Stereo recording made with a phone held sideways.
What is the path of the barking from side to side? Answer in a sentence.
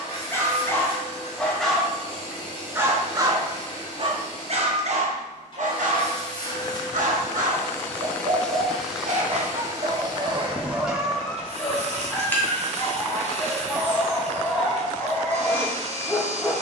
In this clip you hear the barking go right and come back.